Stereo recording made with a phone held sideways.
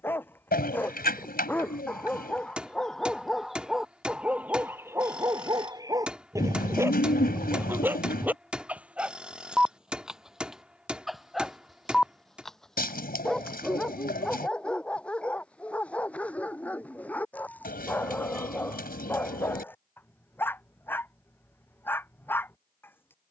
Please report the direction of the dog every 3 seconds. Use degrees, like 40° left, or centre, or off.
10° left, 10° right, 10° right, centre, 10° left, 10° left, 10° left, 10° left.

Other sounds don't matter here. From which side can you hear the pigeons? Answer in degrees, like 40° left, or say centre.
70° left.